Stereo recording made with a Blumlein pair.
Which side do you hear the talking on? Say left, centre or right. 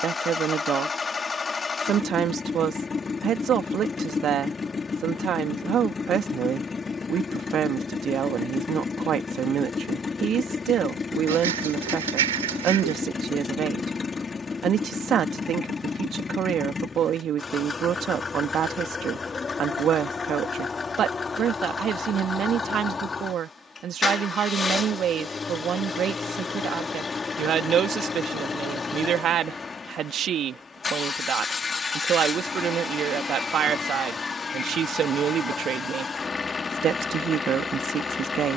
right.